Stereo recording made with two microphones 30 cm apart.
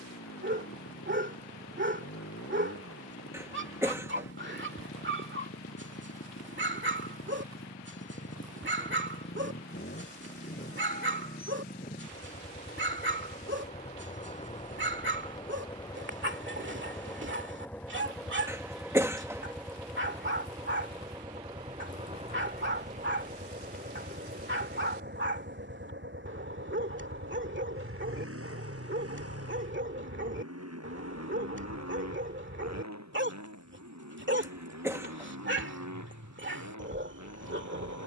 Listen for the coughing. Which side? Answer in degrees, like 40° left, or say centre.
10° right.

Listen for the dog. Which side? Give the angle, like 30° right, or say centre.
40° right.